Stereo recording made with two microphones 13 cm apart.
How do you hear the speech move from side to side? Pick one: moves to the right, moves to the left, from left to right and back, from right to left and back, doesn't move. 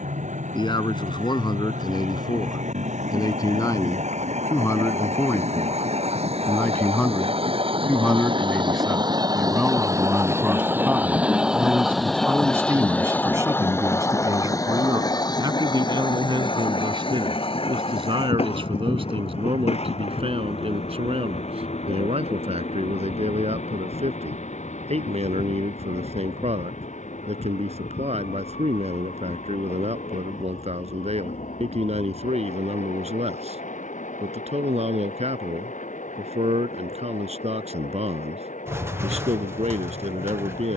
moves to the right.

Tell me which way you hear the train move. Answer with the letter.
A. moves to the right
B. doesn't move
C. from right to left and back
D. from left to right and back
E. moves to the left
E.